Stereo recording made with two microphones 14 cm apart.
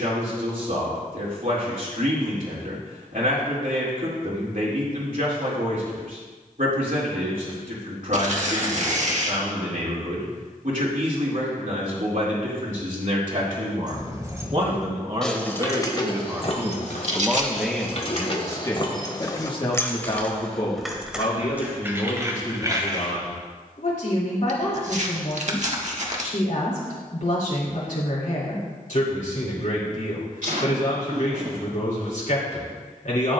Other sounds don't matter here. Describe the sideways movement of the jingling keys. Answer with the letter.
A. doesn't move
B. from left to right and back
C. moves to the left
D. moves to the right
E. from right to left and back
E.